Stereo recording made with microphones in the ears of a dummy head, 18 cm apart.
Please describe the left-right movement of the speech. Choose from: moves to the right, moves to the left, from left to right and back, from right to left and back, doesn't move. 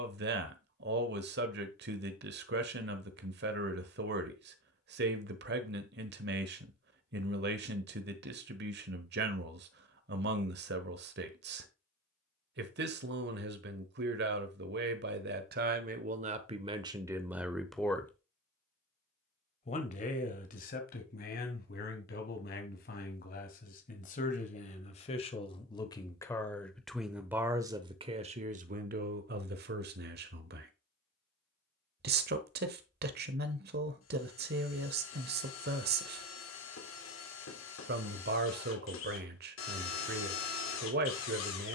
from right to left and back.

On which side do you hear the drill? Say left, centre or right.
left.